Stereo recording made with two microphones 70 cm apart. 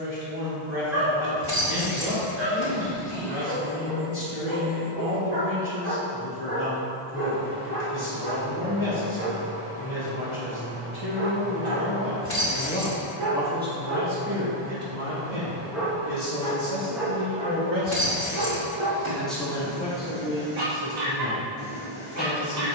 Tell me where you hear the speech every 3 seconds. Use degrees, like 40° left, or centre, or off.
40° left, 40° left, 40° left, 40° left, 10° right, 40° right, 10° left, 30° left.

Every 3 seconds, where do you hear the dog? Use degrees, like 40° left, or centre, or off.
70° right, 70° right, 70° right, 50° right, 20° right, centre, 50° right, 70° right.